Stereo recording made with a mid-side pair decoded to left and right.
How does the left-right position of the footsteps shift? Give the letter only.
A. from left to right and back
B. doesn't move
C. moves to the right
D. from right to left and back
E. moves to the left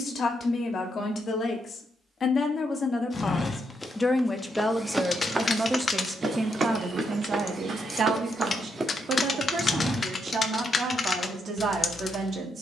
A.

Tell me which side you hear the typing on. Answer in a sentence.
In this clip you hear the typing on the left.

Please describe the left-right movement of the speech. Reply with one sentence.
You can hear the speech go from the left side to the right.